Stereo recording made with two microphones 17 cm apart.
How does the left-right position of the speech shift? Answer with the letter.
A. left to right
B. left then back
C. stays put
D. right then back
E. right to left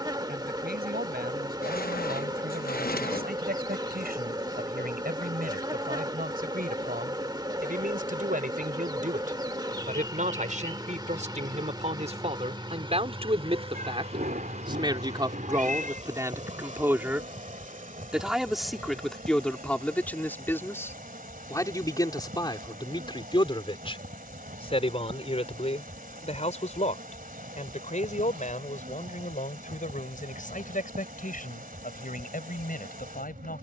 E.